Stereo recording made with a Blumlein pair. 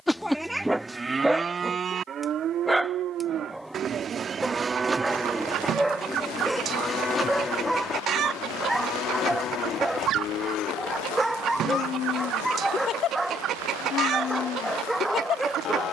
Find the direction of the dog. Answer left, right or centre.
centre.